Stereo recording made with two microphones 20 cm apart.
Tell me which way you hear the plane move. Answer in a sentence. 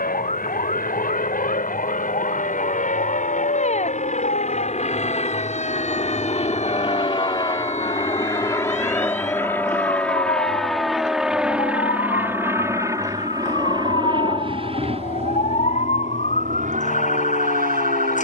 In this clip you hear the plane travel towards the right.